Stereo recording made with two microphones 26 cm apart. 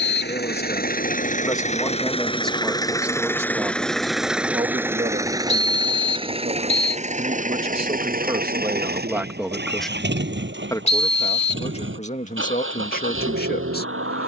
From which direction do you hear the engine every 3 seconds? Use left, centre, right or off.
left, centre, right, right, right.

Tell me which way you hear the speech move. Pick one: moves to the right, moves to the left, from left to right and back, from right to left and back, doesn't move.
from left to right and back.